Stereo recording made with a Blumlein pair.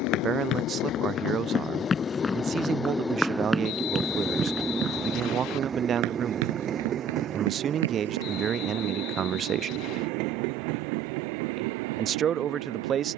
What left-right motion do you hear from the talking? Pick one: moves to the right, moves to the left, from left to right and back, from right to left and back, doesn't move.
doesn't move.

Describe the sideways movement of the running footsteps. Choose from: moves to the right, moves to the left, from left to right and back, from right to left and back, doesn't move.
moves to the right.